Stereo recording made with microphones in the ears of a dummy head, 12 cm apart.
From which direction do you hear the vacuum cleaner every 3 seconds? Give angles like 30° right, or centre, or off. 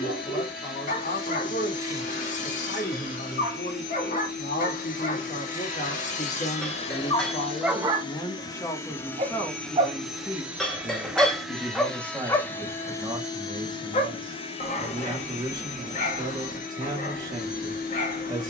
80° left, 70° left, 40° left, centre, 30° left, 60° left.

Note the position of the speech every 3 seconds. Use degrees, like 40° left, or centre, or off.
70° left, 60° left, 30° left, centre, 30° right, 30° right.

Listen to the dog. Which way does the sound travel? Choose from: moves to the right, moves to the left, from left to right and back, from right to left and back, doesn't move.
from left to right and back.